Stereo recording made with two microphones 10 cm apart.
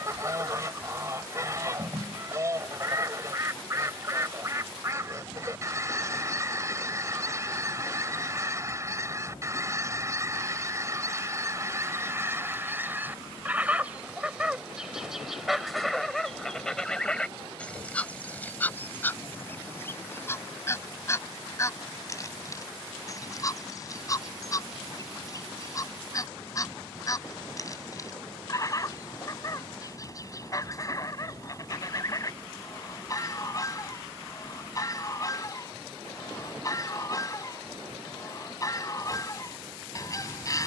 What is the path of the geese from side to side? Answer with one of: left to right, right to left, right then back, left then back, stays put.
right to left.